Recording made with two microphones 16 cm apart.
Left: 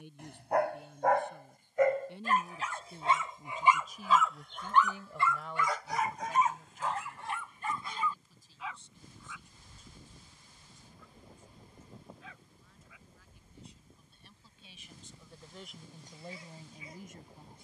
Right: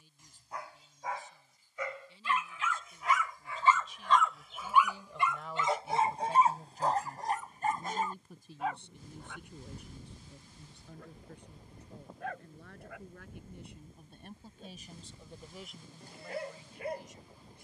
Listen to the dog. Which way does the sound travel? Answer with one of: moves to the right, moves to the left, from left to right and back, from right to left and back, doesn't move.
moves to the right.